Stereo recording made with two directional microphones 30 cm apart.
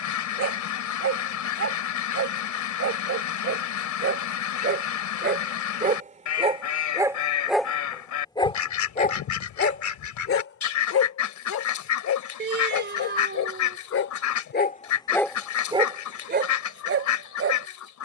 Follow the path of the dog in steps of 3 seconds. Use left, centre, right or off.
right, right, centre, left, left, right.